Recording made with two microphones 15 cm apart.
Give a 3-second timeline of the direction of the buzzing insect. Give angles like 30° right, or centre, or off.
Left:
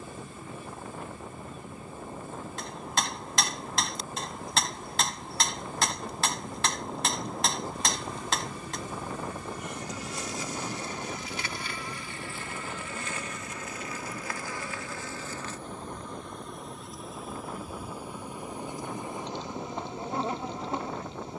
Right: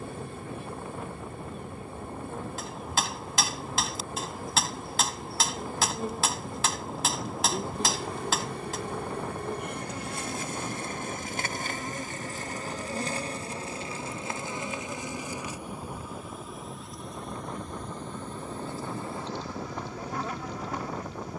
60° right, 60° right, 60° right, 50° right, 30° right, centre, 20° left.